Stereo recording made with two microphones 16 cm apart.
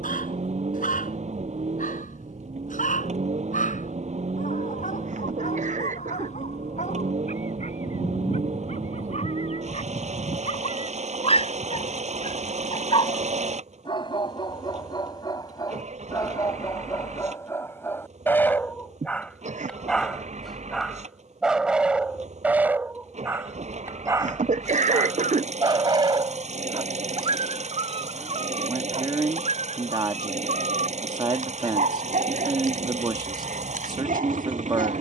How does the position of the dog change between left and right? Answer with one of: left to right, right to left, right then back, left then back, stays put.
left to right.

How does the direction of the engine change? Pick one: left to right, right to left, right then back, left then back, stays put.
stays put.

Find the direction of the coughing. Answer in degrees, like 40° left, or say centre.
50° right.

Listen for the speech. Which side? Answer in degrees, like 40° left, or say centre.
30° right.